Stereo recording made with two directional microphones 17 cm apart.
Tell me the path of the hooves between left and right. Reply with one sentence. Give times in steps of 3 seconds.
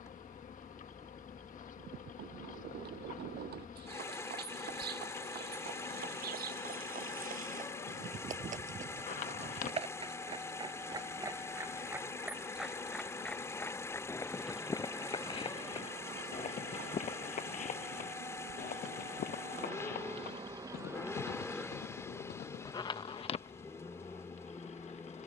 In this clip you hear the hooves on the right from 0 s, in the centre from 12 s, on the left from 15 s and not at all from 24 s.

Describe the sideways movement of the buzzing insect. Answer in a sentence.
In this clip you hear the buzzing insect move from left to right and back again.